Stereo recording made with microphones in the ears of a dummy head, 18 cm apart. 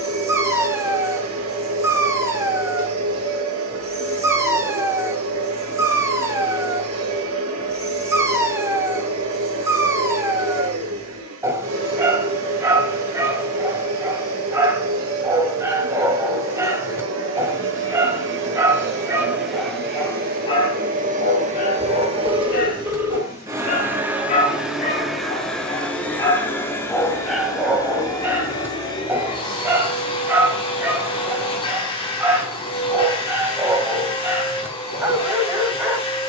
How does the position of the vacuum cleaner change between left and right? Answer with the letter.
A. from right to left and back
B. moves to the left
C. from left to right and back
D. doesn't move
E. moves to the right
B.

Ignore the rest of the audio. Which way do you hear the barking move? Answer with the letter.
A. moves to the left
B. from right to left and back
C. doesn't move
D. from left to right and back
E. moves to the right
B.